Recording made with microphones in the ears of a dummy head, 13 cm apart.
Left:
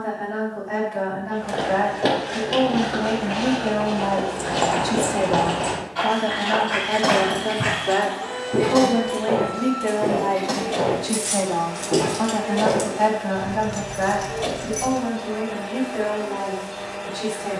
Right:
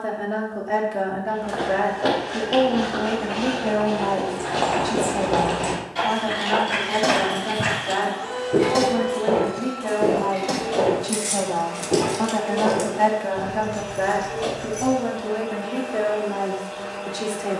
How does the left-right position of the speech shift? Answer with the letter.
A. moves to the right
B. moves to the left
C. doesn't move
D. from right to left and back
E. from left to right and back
D.